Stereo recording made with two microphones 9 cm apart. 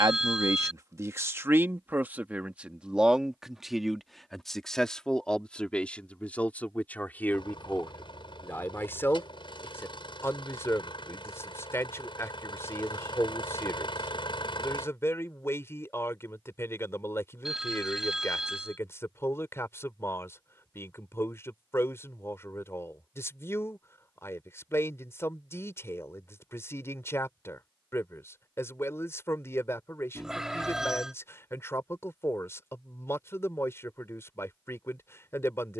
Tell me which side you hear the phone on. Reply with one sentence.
In this clip you hear the phone in the centre.